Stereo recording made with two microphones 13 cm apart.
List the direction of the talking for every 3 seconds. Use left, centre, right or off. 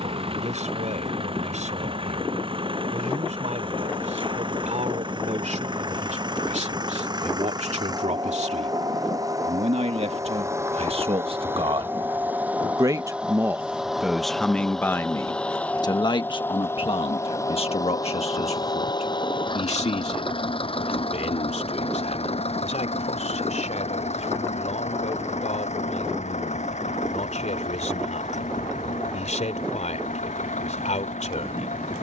right, right, right, right, centre, left, left, left, left, left, left.